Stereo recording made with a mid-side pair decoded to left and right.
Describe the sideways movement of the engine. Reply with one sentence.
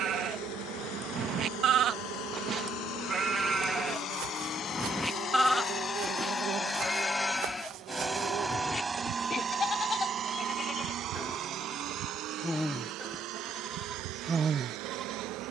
You can hear the engine travel towards the right.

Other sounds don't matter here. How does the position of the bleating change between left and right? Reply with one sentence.
In this clip you hear the bleating move from right to left and back again.